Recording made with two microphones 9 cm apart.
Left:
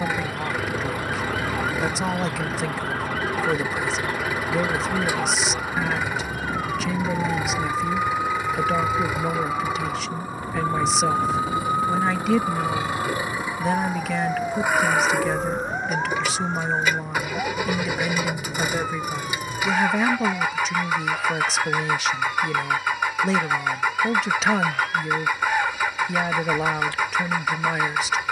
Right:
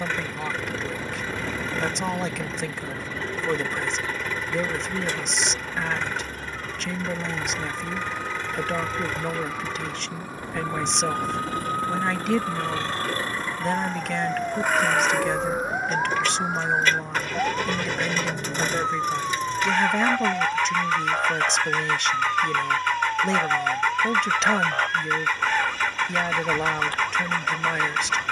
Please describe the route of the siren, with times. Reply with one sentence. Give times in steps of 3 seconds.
In this clip you hear the siren on the left from 0 s, in the centre from 12 s and on the right from 18 s.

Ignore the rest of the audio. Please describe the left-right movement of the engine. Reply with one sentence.
In this clip you hear the engine stay put.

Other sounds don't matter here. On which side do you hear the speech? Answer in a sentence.
In this clip you hear the speech in the centre.